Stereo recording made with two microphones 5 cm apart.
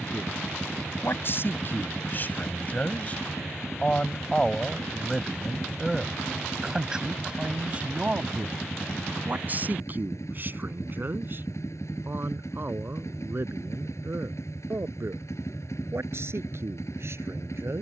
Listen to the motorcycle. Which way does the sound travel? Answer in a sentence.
In this clip you hear the motorcycle stay put.